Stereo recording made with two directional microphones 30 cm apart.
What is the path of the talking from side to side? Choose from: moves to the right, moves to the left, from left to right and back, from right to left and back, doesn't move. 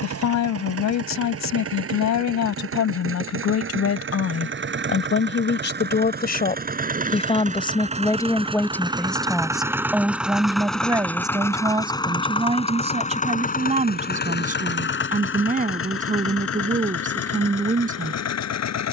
moves to the right.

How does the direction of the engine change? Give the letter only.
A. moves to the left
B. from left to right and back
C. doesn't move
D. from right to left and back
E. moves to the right
A.